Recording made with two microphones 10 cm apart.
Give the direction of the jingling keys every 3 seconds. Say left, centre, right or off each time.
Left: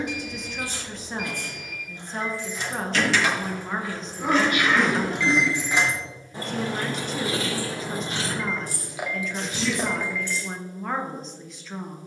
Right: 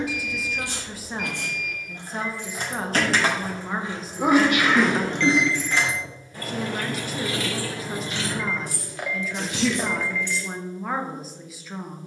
right, centre, left, left.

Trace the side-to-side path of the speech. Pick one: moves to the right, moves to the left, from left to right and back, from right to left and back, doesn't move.
doesn't move.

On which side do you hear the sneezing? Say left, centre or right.
right.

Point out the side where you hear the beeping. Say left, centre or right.
centre.